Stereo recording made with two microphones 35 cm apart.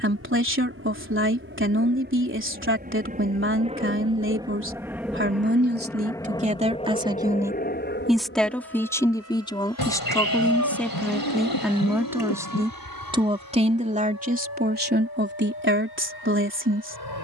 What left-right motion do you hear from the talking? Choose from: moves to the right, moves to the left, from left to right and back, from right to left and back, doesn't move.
from right to left and back.